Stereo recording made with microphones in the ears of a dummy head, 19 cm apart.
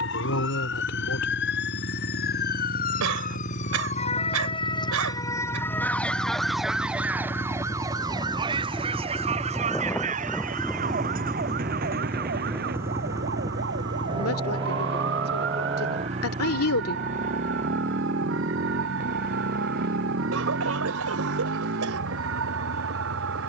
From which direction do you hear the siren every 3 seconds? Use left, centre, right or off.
left, left, centre, right, right, right, right, right.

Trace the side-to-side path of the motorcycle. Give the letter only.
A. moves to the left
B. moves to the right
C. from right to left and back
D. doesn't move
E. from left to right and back
B.